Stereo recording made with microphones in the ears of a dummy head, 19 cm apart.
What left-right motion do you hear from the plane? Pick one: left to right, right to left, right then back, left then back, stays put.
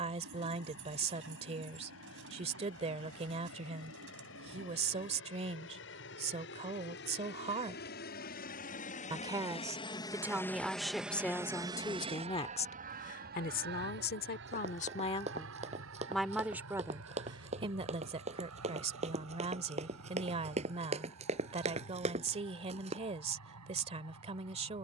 left to right.